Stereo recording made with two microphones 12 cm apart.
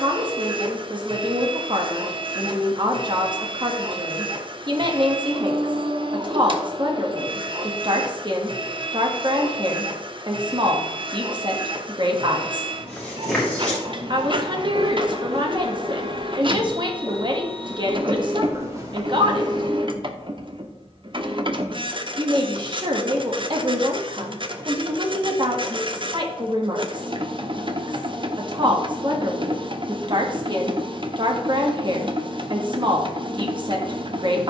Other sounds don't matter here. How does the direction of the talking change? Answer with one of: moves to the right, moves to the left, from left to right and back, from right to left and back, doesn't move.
doesn't move.